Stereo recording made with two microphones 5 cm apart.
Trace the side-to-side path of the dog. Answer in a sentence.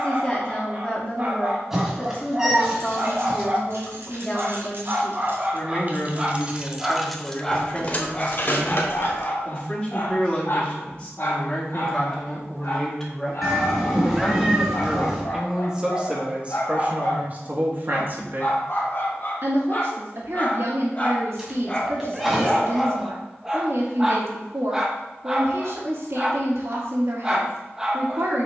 In this clip you hear the dog move from right to left and back again.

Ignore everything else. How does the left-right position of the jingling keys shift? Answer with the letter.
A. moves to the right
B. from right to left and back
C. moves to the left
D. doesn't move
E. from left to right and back
C.